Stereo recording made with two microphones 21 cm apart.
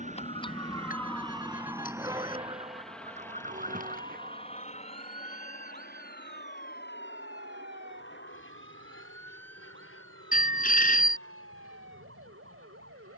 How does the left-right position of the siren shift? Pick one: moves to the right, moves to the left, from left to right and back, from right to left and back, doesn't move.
moves to the right.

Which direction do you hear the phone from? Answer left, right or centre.
left.